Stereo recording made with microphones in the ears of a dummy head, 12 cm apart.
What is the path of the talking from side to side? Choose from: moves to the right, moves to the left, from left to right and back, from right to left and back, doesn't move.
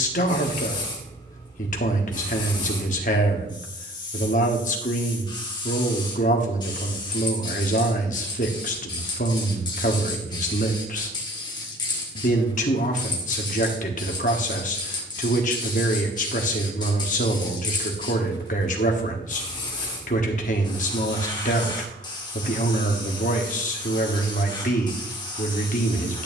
doesn't move.